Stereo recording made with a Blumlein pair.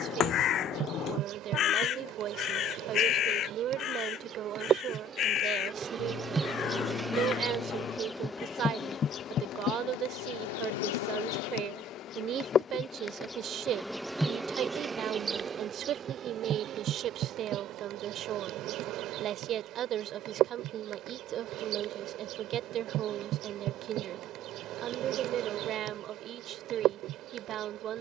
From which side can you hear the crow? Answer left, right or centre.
left.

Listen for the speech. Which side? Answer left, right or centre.
right.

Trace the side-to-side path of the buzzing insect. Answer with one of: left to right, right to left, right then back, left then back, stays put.
left then back.